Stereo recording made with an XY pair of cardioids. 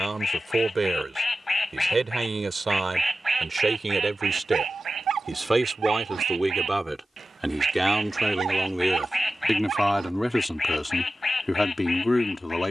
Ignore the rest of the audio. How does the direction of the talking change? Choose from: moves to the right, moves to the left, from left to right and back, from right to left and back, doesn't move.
moves to the left.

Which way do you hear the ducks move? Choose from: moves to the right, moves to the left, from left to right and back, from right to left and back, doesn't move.
from left to right and back.